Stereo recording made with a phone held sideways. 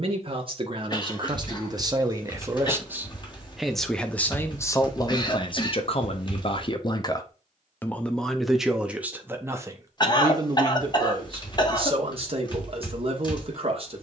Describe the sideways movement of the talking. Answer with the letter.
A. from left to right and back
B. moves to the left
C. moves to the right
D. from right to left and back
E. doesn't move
D.